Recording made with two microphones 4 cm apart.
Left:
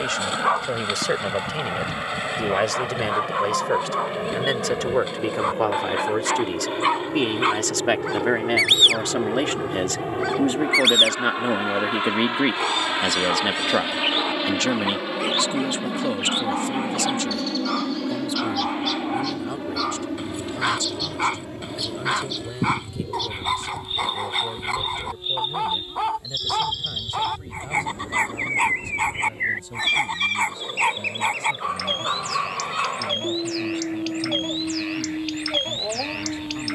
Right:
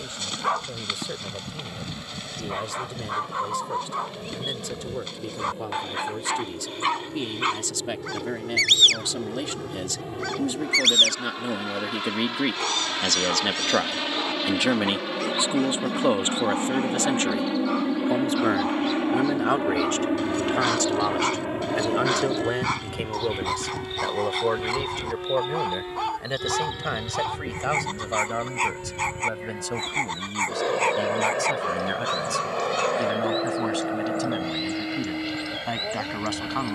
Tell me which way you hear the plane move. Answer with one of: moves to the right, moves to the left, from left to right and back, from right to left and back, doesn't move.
moves to the right.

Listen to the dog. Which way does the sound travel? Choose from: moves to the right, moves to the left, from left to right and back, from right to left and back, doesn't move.
doesn't move.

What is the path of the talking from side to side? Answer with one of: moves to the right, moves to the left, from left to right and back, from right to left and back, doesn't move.
moves to the right.